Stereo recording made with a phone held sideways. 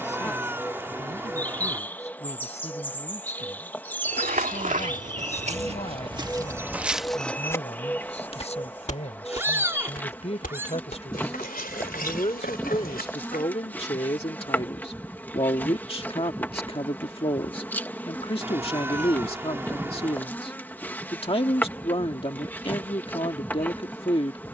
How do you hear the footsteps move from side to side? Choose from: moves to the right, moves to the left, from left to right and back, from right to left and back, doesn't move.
moves to the left.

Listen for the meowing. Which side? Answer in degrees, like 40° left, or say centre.
10° right.